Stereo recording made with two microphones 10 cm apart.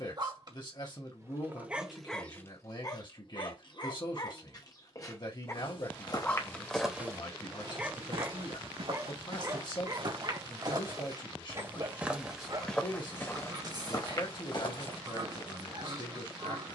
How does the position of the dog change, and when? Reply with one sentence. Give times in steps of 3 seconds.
You can hear the dog in the centre from 0 s, on the left from 3 s, in the centre from 6 s and on the right from 9 s.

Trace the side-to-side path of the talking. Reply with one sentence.
You can hear the talking stay in one place.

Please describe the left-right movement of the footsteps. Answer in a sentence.
In this clip you hear the footsteps move from left to right and back again.